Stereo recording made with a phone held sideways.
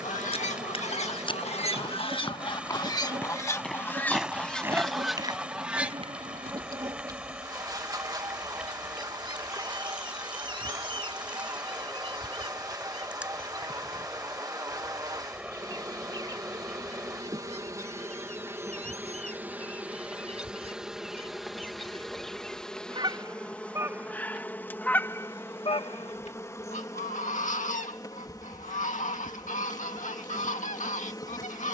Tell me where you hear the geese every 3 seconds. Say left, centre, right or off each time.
left, centre, right, right, right, right, right, right, left, left, left.